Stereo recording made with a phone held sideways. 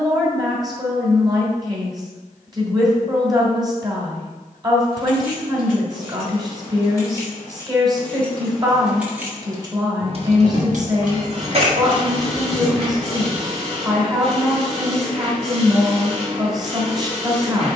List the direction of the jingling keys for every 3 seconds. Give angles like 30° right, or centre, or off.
off, 40° left, 20° left, 40° right, 20° left, off.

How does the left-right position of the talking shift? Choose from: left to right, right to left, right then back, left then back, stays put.
stays put.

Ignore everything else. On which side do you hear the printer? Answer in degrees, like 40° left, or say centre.
40° right.